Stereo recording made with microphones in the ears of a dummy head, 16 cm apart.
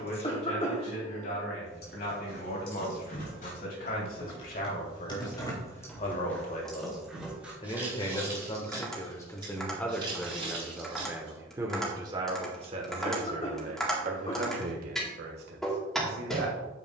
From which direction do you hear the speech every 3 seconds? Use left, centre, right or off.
left, left, left, centre, right, right.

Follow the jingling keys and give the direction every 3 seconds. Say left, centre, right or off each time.
left, left, centre, right, off, off.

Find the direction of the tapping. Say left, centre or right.
centre.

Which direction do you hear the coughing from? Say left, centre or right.
left.